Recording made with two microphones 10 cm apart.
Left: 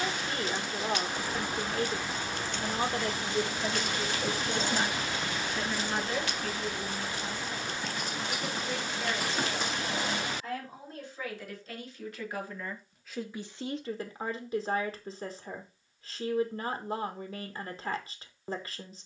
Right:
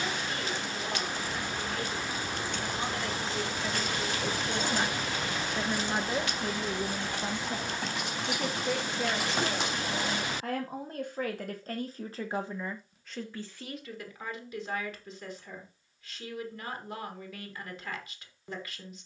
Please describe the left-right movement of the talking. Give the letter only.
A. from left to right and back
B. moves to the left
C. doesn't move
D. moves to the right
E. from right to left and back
A.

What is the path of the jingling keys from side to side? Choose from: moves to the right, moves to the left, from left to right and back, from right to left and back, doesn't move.
moves to the right.